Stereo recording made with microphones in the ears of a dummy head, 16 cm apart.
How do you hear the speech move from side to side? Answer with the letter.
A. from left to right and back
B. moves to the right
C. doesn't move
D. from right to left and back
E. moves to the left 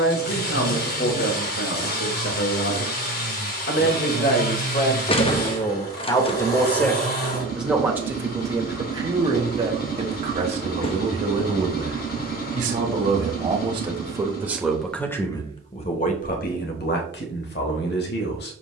A.